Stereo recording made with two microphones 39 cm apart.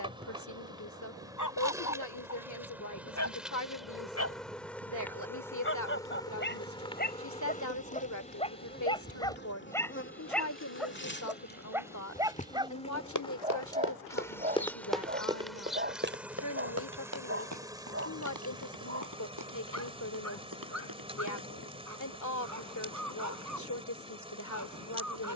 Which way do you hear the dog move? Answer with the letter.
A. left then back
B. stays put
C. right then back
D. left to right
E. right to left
D.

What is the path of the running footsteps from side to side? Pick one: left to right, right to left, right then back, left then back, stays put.
left to right.